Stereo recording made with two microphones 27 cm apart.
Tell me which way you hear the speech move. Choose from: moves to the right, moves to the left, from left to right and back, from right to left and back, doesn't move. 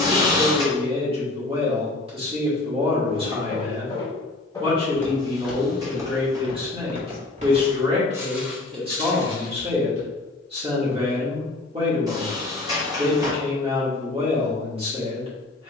doesn't move.